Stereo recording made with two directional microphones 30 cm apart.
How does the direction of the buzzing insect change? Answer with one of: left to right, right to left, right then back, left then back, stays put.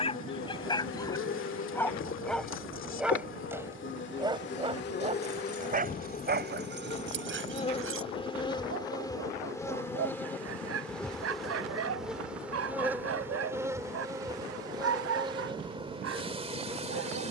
left to right.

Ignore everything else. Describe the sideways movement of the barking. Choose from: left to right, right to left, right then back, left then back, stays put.
left to right.